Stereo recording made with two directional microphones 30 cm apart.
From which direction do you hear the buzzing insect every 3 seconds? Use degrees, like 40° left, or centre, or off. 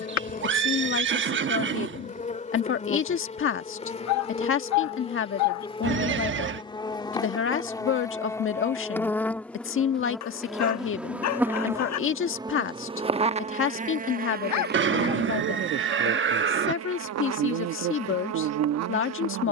30° left, 20° left, 10° left, centre, 20° right, 50° right, 60° right.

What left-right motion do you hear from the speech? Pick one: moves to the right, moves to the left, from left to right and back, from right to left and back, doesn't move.
doesn't move.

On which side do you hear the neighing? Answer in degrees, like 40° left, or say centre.
40° right.